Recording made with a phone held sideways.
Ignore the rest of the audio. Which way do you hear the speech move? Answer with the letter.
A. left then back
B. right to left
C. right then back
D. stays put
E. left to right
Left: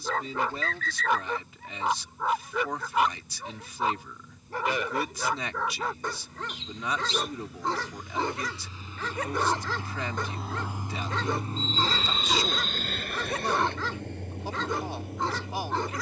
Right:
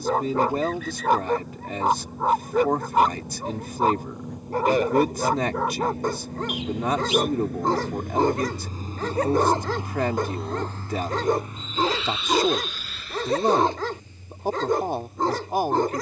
D.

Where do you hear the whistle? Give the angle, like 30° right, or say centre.
10° right.